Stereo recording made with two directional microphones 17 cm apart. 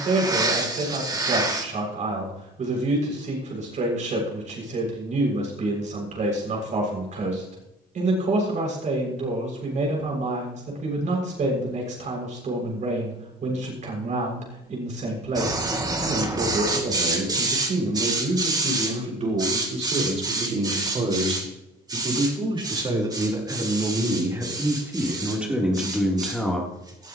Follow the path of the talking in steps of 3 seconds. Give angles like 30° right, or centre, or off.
50° right, 50° right, 50° right, 50° right, 50° right, 50° right, 40° right, 30° right, 10° right.